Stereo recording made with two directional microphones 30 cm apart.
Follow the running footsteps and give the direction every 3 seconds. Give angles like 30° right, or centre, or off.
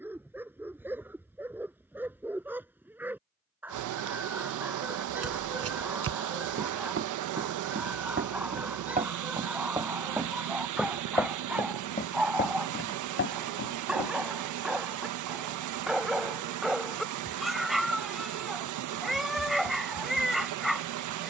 off, 50° right, 40° right, centre, 40° left, off, off.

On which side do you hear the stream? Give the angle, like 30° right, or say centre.
80° right.